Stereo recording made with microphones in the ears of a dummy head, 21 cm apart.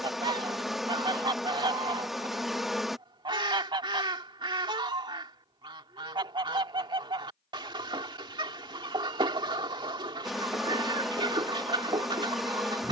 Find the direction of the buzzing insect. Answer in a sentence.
In this clip you hear the buzzing insect in the centre.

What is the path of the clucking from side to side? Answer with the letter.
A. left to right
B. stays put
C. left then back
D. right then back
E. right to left
B.